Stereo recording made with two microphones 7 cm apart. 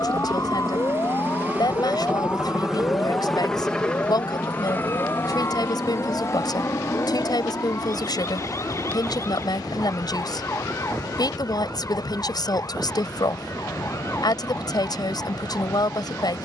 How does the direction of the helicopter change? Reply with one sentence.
You can hear the helicopter travel towards the left.